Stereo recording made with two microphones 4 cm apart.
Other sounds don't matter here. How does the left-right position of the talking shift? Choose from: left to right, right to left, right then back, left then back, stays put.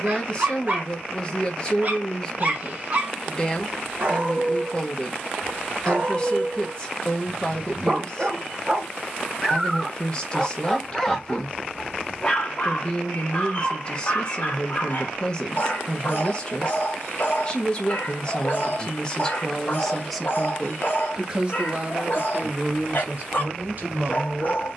left to right.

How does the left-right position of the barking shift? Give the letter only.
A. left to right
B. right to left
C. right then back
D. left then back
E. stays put
B.